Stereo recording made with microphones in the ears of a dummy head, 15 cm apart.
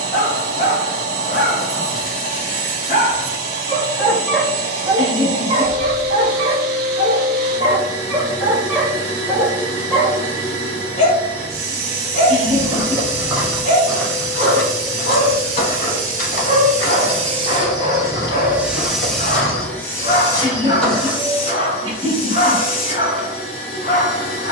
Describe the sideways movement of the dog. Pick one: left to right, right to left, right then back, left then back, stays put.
right then back.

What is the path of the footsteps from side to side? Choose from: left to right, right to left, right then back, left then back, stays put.
left then back.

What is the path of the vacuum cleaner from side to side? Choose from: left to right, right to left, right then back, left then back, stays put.
right to left.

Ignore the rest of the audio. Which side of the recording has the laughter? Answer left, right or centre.
right.